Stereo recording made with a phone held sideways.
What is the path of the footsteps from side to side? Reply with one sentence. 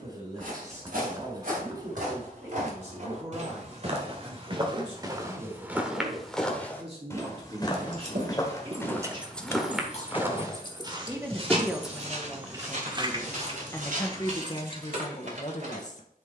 You can hear the footsteps go left and come back.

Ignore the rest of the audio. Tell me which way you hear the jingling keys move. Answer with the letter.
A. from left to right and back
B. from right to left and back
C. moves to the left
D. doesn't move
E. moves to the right
B.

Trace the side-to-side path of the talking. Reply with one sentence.
You can hear the talking go from the right side to the left.